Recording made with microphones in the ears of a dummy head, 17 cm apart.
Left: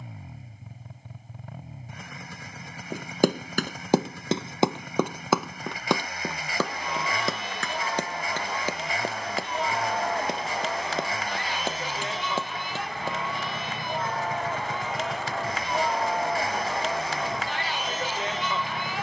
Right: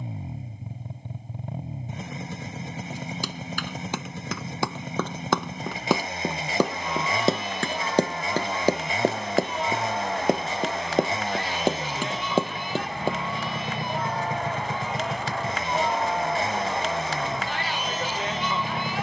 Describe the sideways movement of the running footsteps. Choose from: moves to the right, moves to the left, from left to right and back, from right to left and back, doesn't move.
moves to the right.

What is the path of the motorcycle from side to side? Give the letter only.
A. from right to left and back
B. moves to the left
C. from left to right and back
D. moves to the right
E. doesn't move
E.